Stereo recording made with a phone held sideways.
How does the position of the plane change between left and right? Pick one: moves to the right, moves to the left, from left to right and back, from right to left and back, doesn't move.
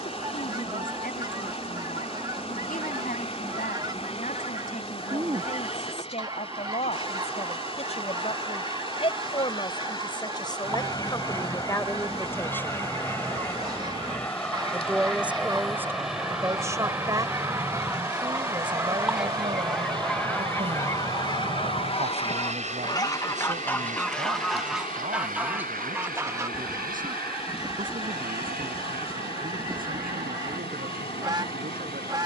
moves to the right.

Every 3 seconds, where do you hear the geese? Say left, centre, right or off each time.
right, right, right, right, right, right, centre, left, centre, right, right.